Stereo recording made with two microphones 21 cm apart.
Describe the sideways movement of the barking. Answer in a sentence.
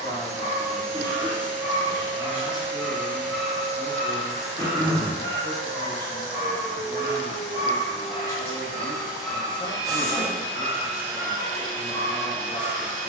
In this clip you hear the barking go left and come back.